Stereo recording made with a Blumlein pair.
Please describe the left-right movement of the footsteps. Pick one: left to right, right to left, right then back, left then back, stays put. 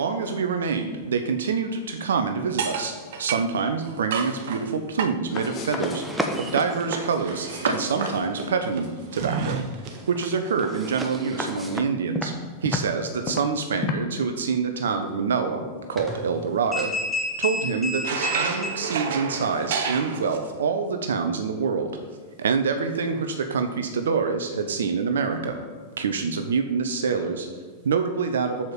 right then back.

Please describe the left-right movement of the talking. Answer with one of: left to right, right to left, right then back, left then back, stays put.
stays put.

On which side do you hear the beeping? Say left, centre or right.
centre.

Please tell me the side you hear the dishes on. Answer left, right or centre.
right.